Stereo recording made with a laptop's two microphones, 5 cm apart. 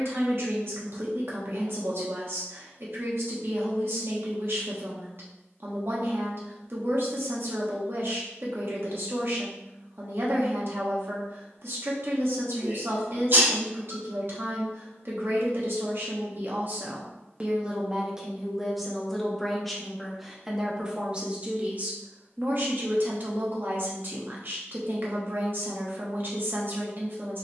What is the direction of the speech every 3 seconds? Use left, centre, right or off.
right, right, right, right, right, right, centre, right, right.